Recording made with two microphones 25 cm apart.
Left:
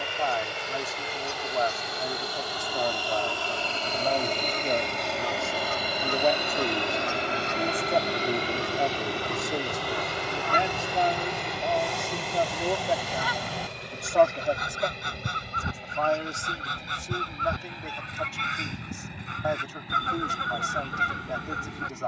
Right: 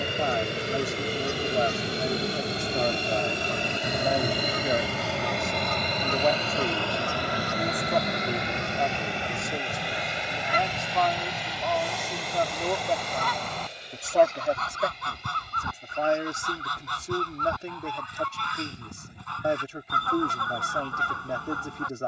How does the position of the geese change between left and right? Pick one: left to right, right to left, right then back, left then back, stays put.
right to left.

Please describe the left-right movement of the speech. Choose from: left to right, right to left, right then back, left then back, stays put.
left then back.